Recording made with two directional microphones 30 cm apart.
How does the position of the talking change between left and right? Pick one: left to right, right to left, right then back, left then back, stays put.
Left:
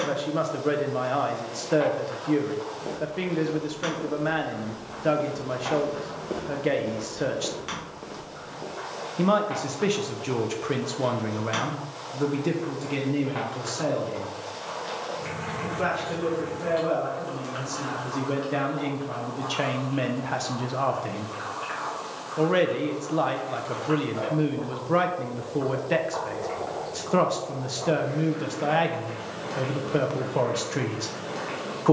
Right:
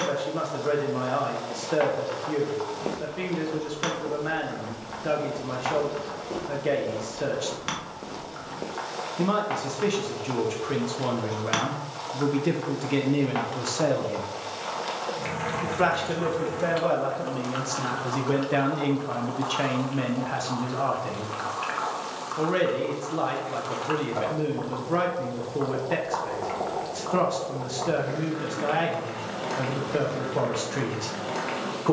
right then back.